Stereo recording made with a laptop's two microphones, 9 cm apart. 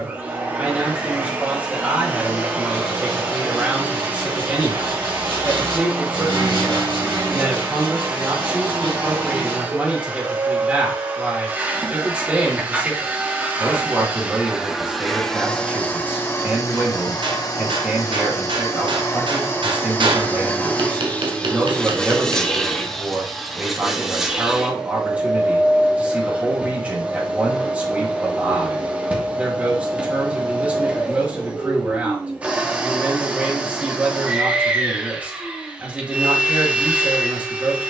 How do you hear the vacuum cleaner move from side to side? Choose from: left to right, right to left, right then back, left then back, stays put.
left then back.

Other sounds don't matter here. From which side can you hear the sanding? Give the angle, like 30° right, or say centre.
70° right.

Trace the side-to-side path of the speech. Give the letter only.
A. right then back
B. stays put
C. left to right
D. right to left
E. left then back
B.